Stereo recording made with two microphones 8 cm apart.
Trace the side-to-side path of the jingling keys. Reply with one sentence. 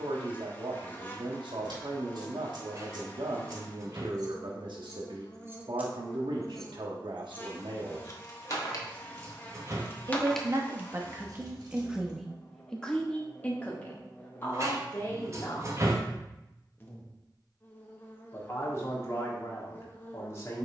You can hear the jingling keys go left and come back.